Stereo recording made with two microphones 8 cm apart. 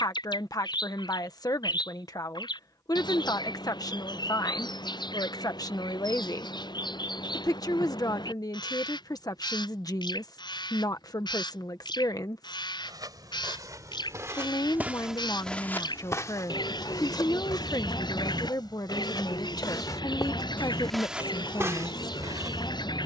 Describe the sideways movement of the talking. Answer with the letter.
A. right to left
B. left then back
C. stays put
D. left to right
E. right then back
C.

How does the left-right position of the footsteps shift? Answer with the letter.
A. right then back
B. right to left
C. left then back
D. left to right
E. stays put
C.